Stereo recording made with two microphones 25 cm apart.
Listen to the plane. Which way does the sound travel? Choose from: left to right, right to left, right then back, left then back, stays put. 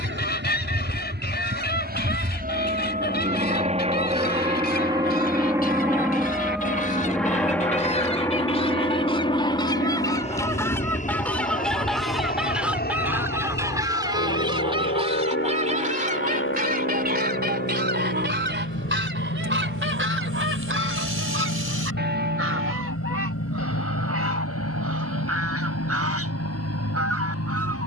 right to left.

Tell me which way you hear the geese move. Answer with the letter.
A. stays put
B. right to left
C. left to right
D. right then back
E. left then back
C.